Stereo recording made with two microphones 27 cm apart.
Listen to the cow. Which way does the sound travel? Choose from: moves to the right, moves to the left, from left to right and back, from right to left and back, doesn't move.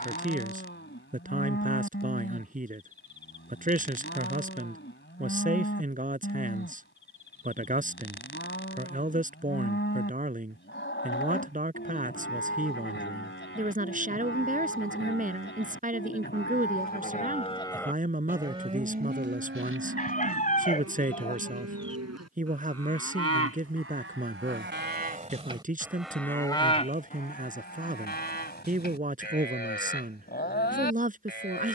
from left to right and back.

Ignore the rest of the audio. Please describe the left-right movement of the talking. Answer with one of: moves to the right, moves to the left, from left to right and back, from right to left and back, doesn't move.
doesn't move.